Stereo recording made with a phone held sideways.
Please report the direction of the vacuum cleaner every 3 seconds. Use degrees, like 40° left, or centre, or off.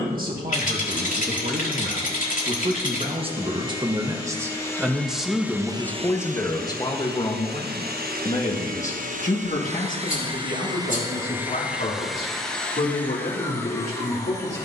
30° left, 10° left, 60° right, 30° right, 10° left.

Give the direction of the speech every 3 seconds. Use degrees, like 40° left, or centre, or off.
50° right, 10° right, 30° left, 60° left, 70° left.